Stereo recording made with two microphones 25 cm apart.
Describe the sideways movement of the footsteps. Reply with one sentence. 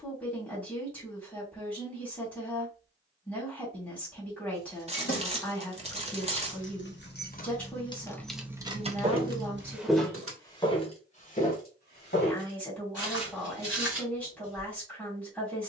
You can hear the footsteps go from the right side to the left.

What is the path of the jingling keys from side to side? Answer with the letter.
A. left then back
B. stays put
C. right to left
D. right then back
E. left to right
E.